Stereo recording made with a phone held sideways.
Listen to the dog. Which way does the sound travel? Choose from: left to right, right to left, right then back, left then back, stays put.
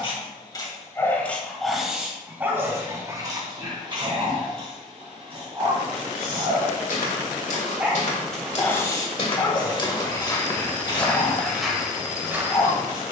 right then back.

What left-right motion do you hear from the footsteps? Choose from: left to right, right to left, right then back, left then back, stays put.
left to right.